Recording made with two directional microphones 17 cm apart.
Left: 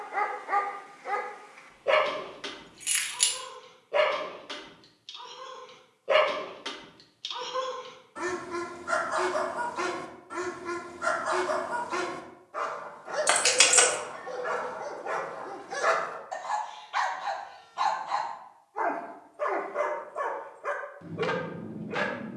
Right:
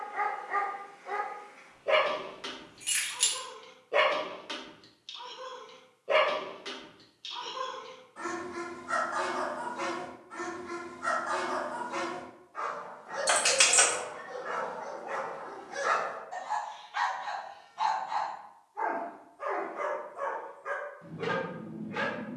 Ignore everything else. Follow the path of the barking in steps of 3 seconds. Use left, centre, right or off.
left, centre, left, left, left, left, left, left.